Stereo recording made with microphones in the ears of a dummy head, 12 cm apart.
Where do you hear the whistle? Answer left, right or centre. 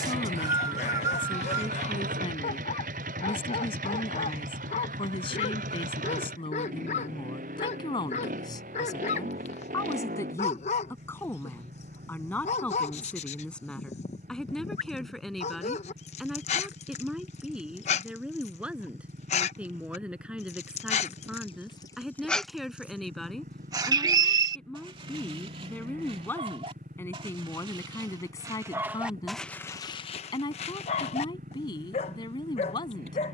right.